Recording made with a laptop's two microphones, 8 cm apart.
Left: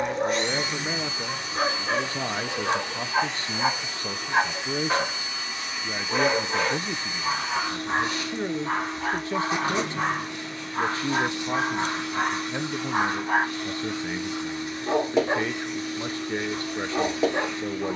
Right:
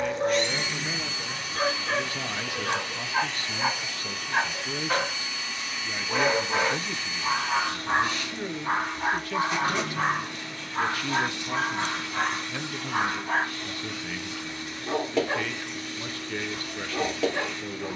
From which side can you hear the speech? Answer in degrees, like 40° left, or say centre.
30° left.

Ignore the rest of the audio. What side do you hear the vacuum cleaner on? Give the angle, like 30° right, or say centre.
20° left.